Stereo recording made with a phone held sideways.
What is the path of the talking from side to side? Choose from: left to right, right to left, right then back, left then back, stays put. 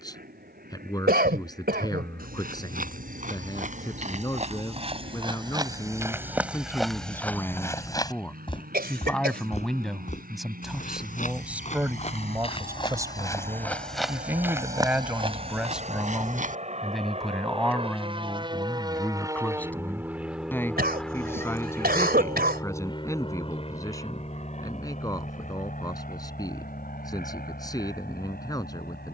right then back.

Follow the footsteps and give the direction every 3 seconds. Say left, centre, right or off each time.
right, right, centre, left, centre, right, off, off, off, off.